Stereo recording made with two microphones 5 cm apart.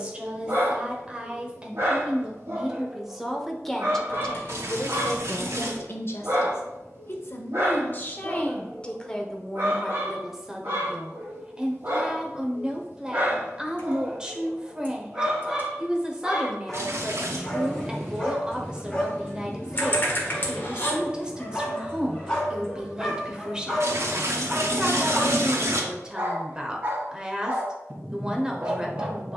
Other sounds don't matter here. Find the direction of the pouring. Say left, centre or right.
right.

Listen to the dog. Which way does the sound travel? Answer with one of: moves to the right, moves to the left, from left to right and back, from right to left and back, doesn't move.
from right to left and back.